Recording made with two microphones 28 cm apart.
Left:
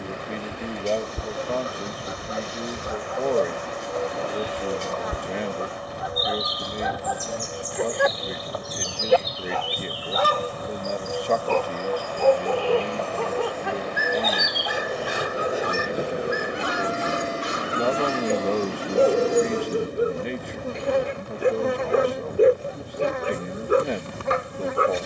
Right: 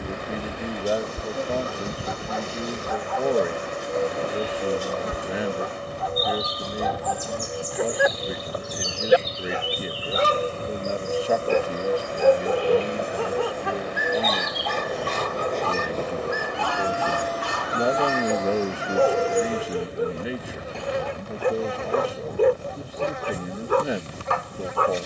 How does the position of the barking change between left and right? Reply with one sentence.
In this clip you hear the barking go right and come back.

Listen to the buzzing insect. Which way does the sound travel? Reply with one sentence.
You can hear the buzzing insect move from right to left.